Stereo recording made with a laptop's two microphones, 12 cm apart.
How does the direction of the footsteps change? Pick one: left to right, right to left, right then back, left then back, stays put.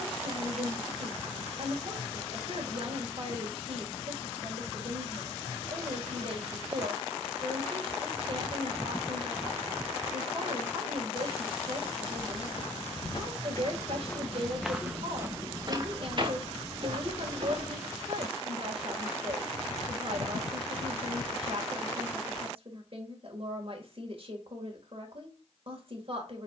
left to right.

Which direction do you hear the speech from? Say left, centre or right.
right.